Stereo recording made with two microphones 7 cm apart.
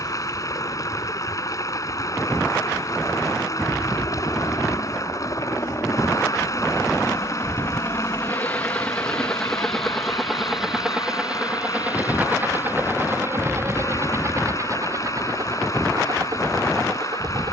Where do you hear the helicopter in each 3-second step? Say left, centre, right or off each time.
left, left, left, centre, right, right.